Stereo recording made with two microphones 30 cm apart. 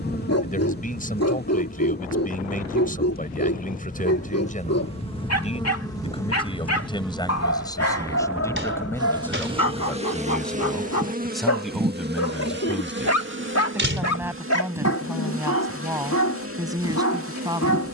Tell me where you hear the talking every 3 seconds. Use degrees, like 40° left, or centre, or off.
30° left, 30° left, 10° left, centre, 10° right, 10° right.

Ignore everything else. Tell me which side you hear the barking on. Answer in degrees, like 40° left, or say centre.
60° left.